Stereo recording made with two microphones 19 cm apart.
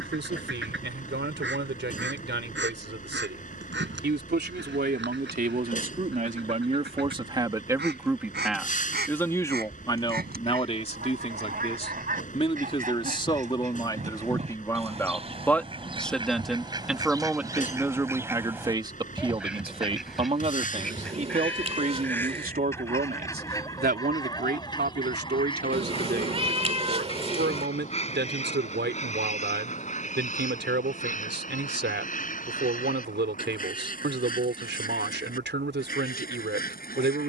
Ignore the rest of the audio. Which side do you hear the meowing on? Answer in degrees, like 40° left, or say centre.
30° right.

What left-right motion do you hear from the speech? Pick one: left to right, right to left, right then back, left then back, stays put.
left then back.